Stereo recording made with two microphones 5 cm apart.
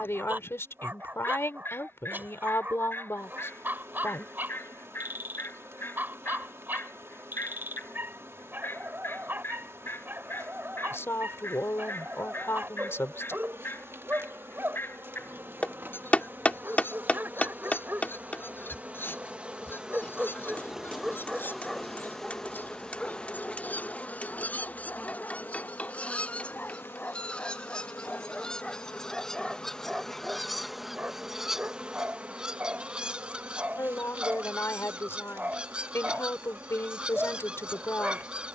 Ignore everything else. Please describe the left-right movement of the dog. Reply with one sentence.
You can hear the dog go left and come back.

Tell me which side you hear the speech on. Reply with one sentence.
In this clip you hear the speech on the left.